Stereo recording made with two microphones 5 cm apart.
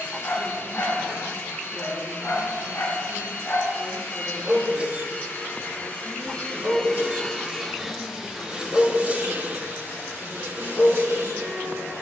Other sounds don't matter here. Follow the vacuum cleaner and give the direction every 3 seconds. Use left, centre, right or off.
left, left, centre, right.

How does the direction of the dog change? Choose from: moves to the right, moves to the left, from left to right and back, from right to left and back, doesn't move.
from left to right and back.